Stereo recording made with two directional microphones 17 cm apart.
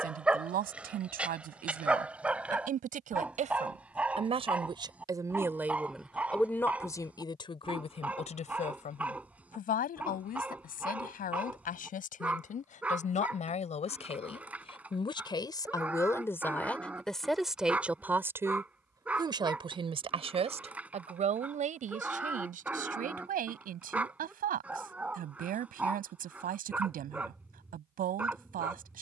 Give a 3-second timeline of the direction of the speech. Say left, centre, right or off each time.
right, right, left, left, left, centre, right, right, right, right.